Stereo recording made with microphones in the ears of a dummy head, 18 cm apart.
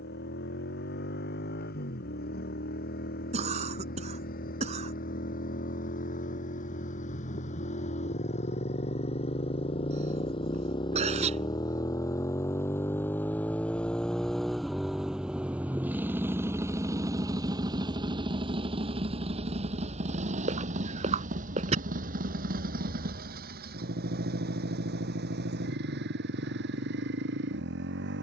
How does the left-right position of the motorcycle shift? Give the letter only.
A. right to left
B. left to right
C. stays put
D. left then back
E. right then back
B.